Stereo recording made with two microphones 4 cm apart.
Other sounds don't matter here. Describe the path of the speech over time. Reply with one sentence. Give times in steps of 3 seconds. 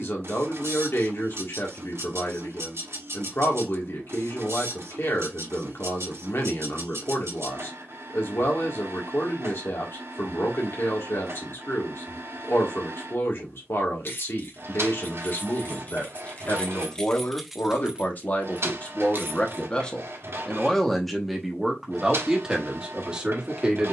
You can hear the speech on the left from 0 s and in the centre from 21 s.